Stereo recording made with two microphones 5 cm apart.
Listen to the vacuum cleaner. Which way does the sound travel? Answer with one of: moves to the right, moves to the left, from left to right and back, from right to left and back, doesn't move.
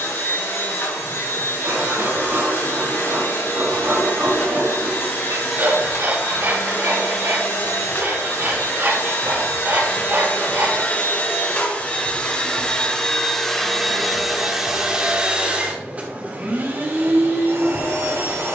moves to the right.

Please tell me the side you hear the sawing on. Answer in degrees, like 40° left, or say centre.
60° right.